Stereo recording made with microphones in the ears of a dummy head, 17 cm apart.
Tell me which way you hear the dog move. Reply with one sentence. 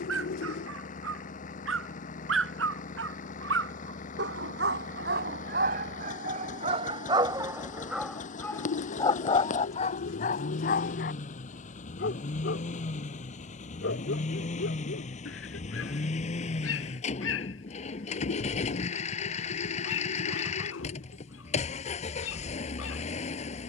You can hear the dog move to the left.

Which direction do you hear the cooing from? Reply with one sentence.
In this clip you hear the cooing on the left.